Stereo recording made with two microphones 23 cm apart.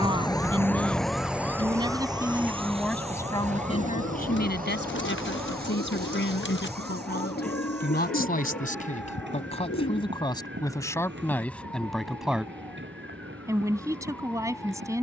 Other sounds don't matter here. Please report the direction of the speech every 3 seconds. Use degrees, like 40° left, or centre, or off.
10° right, 40° left, 50° left, 20° left, 10° right.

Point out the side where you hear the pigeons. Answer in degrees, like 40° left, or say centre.
60° left.